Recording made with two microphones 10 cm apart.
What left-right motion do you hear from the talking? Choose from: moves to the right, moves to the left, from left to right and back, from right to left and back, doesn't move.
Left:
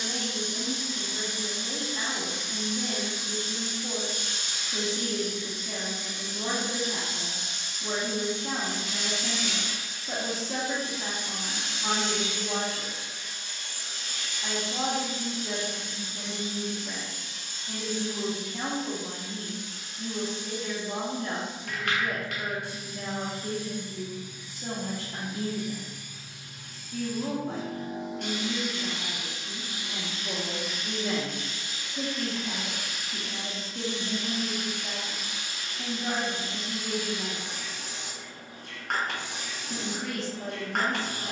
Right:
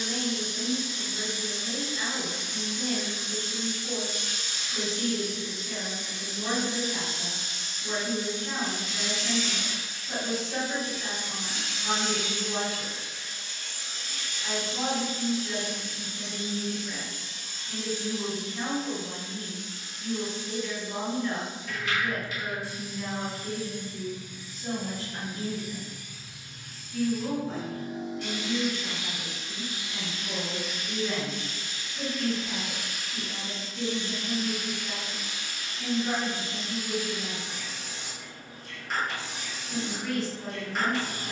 doesn't move.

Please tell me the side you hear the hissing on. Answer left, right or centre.
left.